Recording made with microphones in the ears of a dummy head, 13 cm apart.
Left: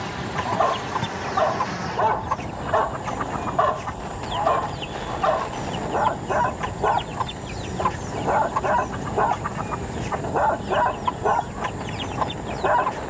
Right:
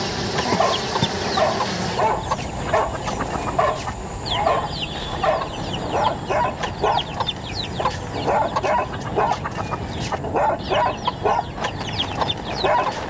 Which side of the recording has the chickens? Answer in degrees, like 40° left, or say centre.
40° right.